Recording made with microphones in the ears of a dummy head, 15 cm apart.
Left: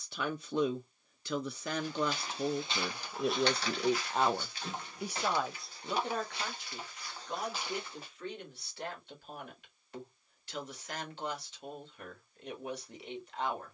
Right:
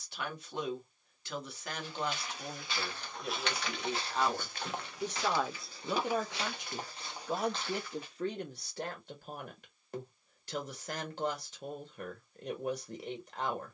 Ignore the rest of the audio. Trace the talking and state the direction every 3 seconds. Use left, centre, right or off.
left, left, right, right, right.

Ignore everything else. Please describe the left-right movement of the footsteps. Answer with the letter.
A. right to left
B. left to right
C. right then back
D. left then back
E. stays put
C.